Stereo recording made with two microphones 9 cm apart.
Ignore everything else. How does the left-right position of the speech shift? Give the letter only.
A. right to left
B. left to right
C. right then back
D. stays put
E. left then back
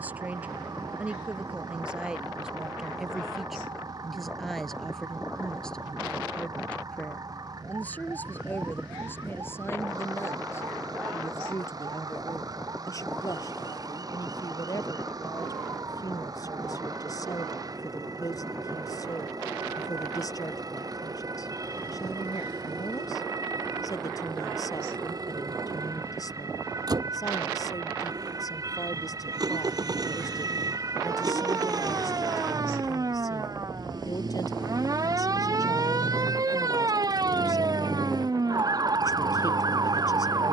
A.